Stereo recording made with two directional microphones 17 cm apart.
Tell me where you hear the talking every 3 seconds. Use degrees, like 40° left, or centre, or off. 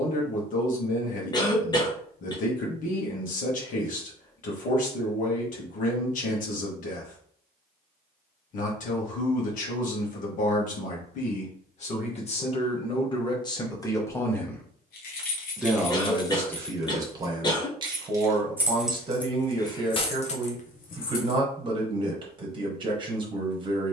50° left, 50° left, 50° left, 50° left, 30° left, 20° right, 30° right, 30° right.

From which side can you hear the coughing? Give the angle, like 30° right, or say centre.
20° left.